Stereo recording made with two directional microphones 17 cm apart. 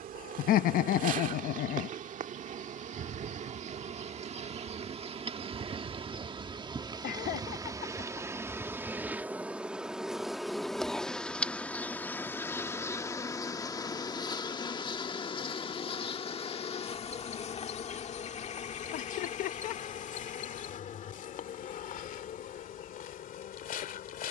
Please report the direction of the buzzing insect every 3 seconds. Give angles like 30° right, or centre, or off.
50° right, 40° right, 20° right, centre, 20° left, 40° left, 50° left, 50° left.